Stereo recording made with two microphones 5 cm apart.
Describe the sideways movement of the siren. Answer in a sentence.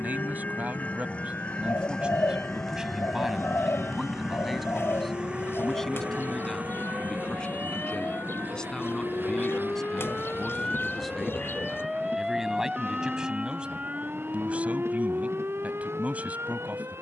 In this clip you hear the siren go from the left side to the right.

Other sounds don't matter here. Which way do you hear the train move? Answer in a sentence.
In this clip you hear the train move from left to right.